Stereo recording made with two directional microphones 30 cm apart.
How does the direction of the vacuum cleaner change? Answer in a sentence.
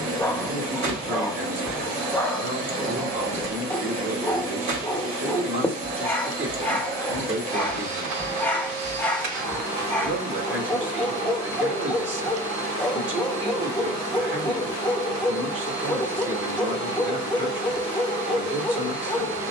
In this clip you hear the vacuum cleaner stay put.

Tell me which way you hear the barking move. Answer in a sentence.
You can hear the barking stay put.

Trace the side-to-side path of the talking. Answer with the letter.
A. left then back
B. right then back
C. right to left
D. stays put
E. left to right
D.